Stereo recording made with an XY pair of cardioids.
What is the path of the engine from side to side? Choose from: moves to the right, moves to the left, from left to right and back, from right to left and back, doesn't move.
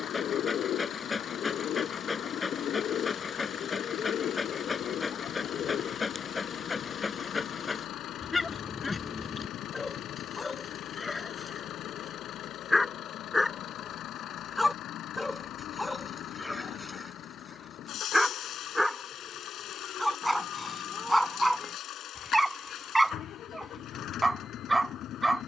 doesn't move.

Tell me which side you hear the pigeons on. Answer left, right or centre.
left.